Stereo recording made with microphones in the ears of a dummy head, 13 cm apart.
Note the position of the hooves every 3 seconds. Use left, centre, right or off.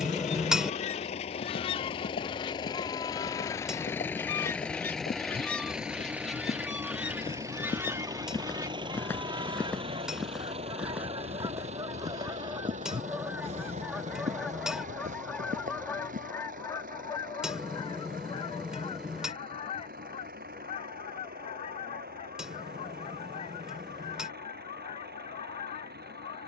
left, left, left, centre, right, right, off, off, off.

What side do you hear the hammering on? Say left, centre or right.
centre.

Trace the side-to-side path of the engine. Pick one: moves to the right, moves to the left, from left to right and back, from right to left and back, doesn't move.
moves to the right.